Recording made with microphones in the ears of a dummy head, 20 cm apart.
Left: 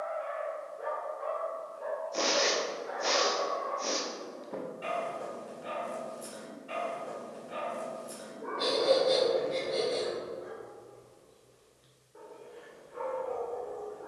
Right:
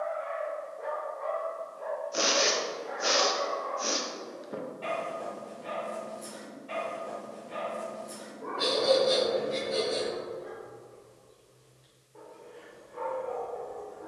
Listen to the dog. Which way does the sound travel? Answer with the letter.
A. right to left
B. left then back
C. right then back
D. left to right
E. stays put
E.